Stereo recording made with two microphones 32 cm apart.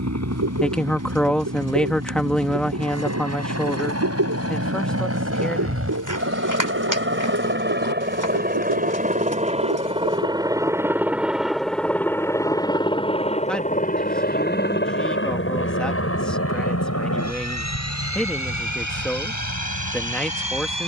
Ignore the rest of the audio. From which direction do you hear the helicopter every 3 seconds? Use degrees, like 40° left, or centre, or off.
60° right, 50° right, 40° right, 10° right, 20° left, 40° left, 60° left.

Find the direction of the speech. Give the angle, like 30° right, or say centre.
centre.